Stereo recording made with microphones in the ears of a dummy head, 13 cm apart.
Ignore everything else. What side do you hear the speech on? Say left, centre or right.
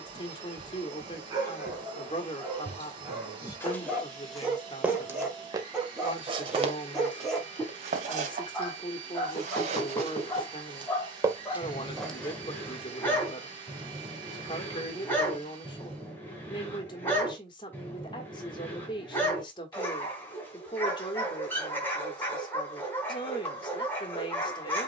left.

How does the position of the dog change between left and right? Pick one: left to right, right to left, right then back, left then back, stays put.
right to left.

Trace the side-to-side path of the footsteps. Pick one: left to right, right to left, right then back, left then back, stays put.
right then back.